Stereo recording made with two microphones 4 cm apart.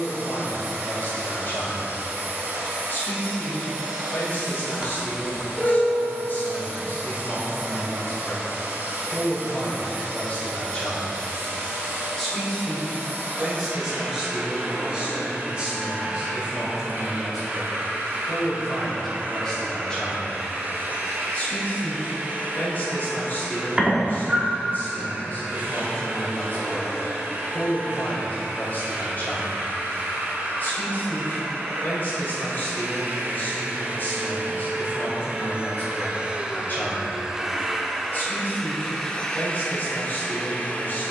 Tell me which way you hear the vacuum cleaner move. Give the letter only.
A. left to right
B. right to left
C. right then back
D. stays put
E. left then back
B.